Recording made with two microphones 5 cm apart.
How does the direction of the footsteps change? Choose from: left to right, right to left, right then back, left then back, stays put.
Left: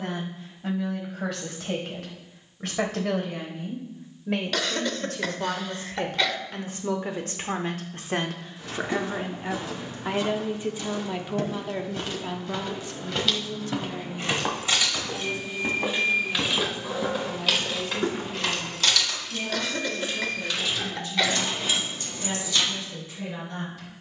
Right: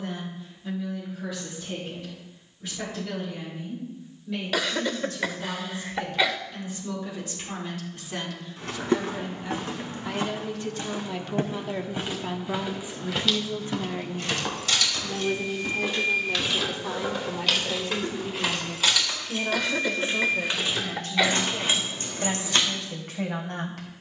right to left.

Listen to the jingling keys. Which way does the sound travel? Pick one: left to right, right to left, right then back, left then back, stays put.
left to right.